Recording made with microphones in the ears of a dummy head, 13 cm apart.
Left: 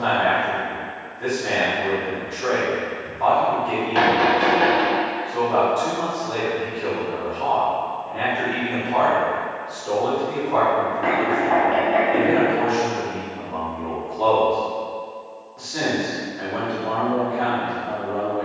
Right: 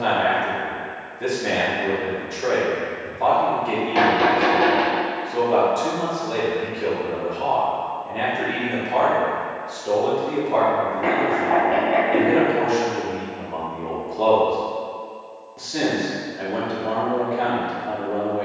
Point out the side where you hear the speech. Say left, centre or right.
right.